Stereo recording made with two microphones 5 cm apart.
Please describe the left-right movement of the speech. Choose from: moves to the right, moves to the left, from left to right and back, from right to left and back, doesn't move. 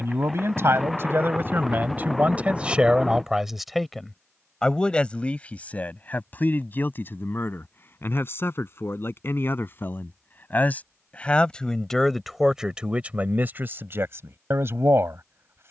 from right to left and back.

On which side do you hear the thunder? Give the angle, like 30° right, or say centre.
centre.